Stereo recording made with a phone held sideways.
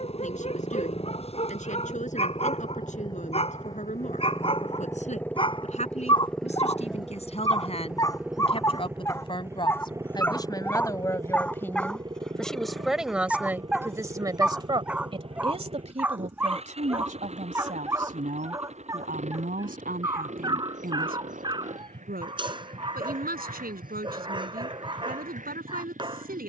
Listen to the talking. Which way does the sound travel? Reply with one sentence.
In this clip you hear the talking move to the right.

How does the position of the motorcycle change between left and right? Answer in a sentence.
In this clip you hear the motorcycle move to the right.